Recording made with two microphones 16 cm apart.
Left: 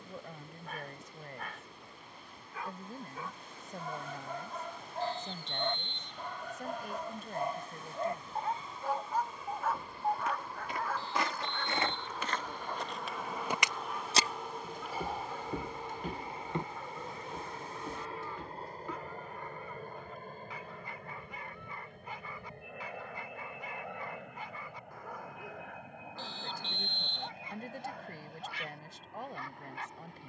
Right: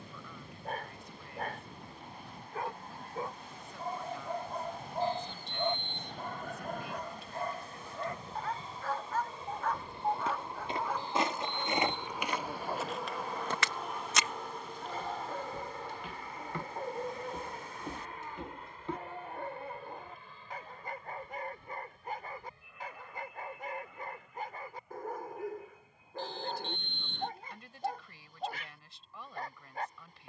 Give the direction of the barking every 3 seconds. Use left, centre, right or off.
right, right, centre, centre, right, right, right, right, right, right.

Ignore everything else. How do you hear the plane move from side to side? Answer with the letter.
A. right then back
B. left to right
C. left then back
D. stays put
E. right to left
E.